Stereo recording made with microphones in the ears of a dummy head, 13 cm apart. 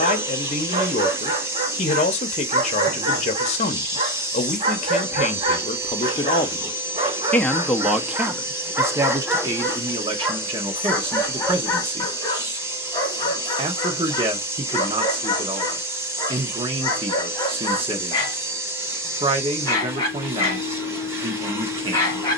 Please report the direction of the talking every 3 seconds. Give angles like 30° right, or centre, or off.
50° left, 50° left, 10° left, 30° right, 40° right, 40° right, 40° right, 40° right.